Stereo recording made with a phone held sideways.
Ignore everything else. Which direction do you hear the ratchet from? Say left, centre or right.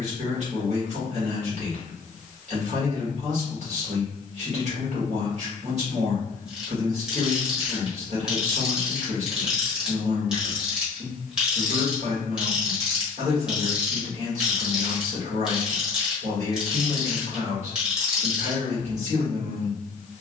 centre.